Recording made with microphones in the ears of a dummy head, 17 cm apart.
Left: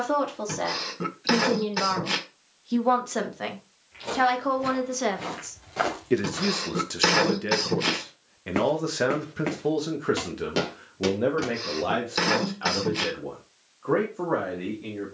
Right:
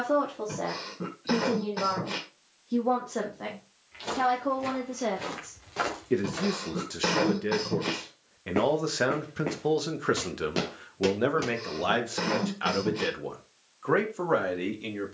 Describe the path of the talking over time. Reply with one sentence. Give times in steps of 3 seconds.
You can hear the talking on the left from 0 s, in the centre from 6 s and on the right from 9 s.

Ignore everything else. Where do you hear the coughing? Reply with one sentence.
You can hear the coughing on the left.